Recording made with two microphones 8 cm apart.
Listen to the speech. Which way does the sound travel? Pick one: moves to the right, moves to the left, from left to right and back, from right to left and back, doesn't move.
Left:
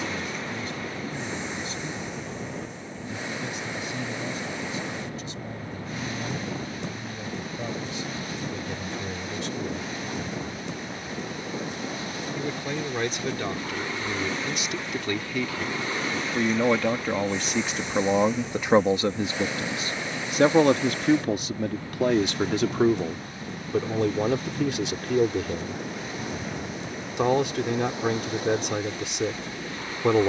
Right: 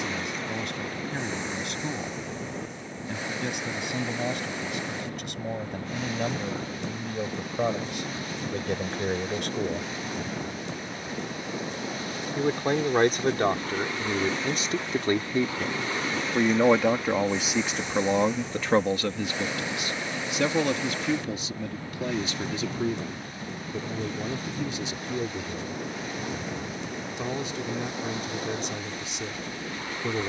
moves to the left.